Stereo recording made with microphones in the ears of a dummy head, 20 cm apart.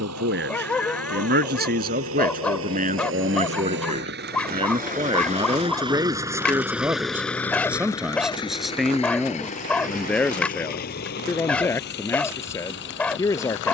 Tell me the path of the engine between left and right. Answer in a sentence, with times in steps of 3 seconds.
In this clip you hear the engine on the right from 0 s, in the centre from 6 s and on the left from 9 s.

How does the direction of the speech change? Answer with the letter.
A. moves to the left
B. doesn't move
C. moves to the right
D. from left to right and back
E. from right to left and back
A.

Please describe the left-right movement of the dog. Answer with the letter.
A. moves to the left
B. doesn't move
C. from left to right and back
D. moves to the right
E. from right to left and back
B.